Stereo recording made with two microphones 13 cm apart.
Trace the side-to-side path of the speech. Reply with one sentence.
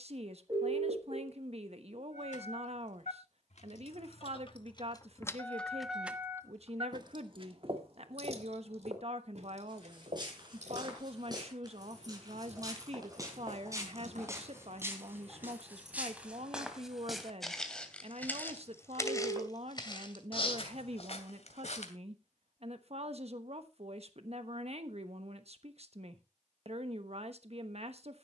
You can hear the speech stay put.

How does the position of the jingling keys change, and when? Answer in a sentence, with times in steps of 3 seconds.
In this clip you hear the jingling keys on the left from 0 s, on the right from 6 s and not at all from 18 s.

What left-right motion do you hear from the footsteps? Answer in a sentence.
You can hear the footsteps move from right to left.